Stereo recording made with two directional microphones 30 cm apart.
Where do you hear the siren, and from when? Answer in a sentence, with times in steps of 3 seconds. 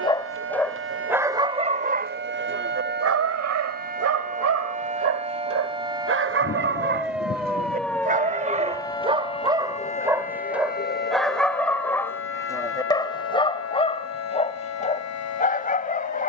You can hear the siren on the right from 0 s, in the centre from 6 s and on the left from 9 s.